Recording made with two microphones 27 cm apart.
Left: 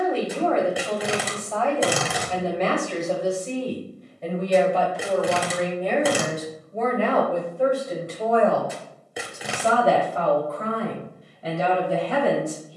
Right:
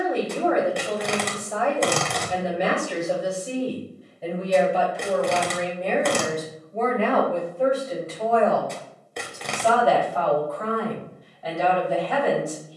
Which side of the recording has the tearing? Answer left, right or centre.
centre.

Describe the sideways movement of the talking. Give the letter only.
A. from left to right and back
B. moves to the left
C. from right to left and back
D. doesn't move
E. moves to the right
B.